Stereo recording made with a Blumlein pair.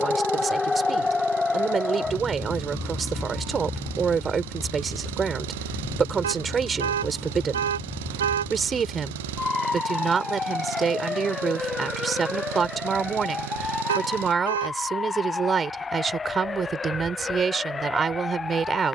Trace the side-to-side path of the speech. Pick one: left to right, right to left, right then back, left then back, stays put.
stays put.